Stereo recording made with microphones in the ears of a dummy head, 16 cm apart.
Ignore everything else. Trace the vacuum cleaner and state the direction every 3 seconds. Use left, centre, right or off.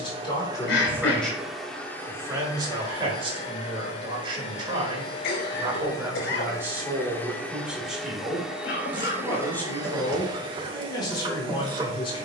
centre, left, centre, right.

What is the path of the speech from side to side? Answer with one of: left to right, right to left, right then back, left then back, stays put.
right then back.